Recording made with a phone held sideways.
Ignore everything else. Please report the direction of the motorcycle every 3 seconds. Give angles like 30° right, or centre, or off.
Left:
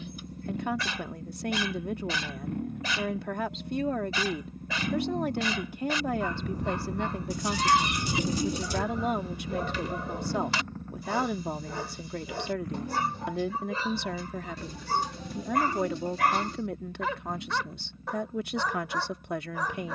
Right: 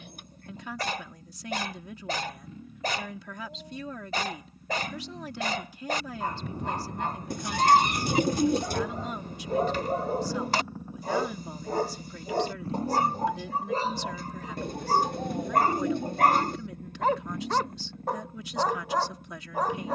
70° left, 50° left, 30° left, 10° right, 30° right, 50° right, 60° right.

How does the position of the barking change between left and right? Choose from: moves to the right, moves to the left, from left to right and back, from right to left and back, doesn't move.
doesn't move.